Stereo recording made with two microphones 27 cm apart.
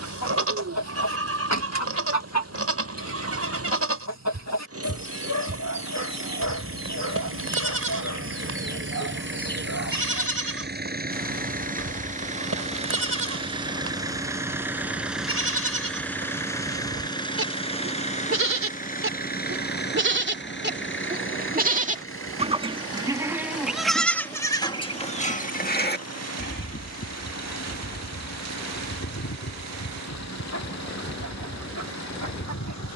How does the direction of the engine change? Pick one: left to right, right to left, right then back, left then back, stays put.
right to left.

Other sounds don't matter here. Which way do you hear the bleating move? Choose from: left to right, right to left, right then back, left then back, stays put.
right to left.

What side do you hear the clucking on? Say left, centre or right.
left.